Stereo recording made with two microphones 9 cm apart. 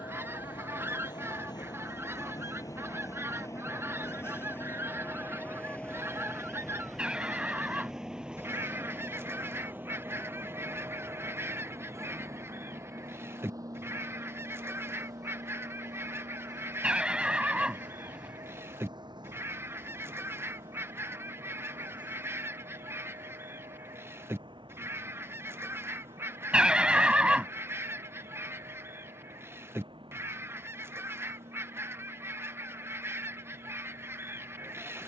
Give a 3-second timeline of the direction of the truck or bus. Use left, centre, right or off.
left, left, centre, right, right, right, right, right, right, right, right, right.